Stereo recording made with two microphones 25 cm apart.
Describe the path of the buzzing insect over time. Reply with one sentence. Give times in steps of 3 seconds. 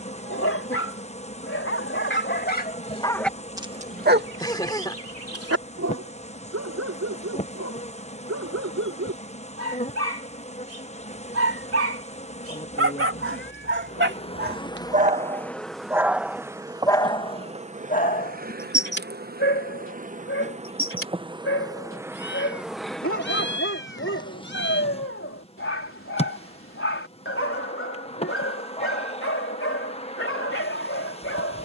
You can hear the buzzing insect on the left from 0 s, in the centre from 15 s, on the right from 18 s, in the centre from 21 s and on the left from 24 s.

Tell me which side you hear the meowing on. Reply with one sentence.
In this clip you hear the meowing on the left.